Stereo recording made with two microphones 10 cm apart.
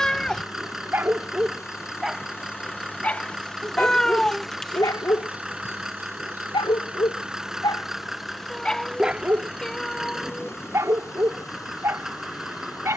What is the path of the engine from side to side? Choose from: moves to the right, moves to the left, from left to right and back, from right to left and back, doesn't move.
doesn't move.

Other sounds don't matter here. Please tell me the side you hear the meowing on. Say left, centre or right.
centre.